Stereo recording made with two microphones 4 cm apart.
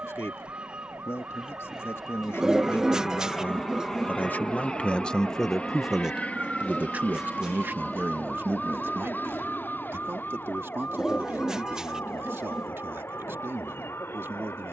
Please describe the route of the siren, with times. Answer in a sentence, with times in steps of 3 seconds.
You can hear the siren on the right from 0 s, in the centre from 6 s and on the left from 9 s.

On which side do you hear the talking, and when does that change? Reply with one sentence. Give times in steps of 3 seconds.
You can hear the talking on the left from 0 s and on the right from 6 s.